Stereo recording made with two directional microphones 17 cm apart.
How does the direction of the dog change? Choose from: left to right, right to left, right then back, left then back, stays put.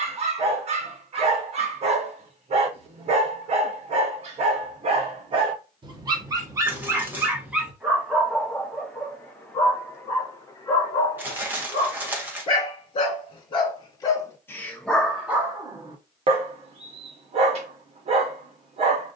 left then back.